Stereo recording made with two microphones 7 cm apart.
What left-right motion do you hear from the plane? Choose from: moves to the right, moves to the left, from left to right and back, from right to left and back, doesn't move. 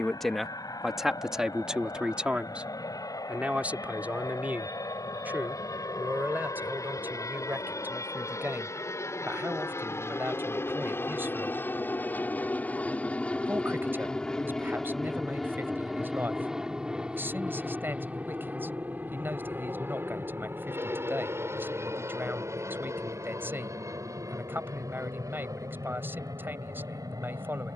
moves to the right.